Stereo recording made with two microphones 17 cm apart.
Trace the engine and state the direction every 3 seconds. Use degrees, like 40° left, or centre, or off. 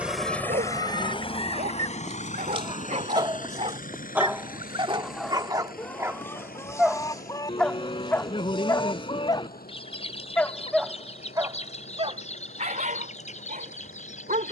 30° left, 60° left, 70° left, 70° left, 70° left.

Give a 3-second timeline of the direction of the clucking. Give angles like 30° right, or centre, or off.
50° right, 10° right, 20° left, 40° left, 50° left.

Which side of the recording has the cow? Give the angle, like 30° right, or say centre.
30° left.